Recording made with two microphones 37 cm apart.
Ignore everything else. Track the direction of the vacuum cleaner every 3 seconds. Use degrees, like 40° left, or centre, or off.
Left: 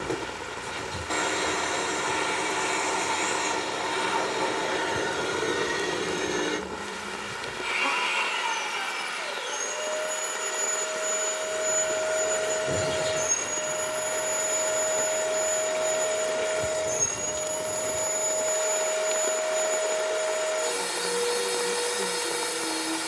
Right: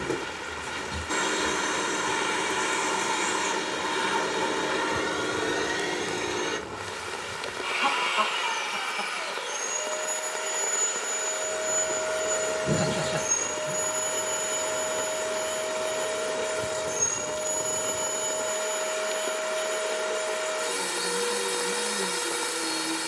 20° right, 10° right, 30° left, 20° left, 20° right, 20° right, 20° right, 20° right.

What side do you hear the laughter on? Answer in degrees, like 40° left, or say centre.
80° right.